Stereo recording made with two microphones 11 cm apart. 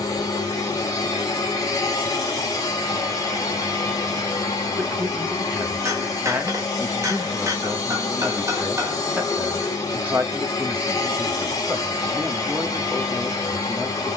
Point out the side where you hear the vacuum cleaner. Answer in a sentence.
You can hear the vacuum cleaner on the left.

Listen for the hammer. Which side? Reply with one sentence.
You can hear the hammer on the right.